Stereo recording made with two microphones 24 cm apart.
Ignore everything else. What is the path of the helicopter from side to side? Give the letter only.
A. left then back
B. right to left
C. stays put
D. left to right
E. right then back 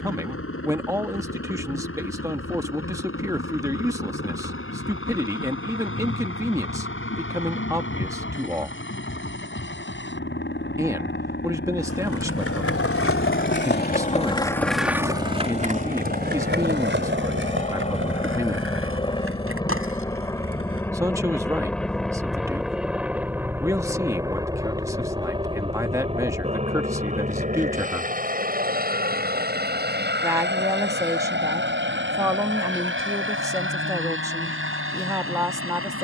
D.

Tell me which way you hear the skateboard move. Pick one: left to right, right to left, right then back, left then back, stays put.
left to right.